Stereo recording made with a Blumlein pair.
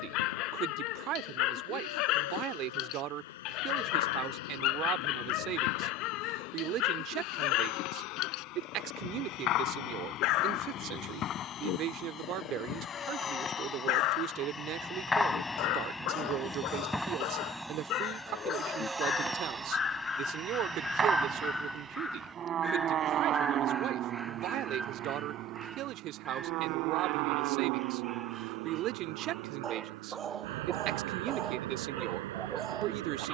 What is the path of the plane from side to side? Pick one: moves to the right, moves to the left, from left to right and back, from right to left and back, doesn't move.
moves to the right.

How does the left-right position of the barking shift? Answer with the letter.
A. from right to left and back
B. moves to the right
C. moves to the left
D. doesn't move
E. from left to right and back
B.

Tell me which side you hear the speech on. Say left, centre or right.
right.